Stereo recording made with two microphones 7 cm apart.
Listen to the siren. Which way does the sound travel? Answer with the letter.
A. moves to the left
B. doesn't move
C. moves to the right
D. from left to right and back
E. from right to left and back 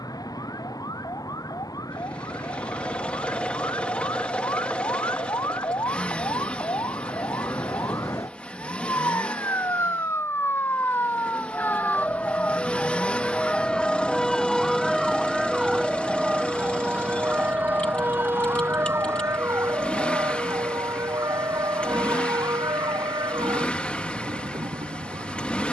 C.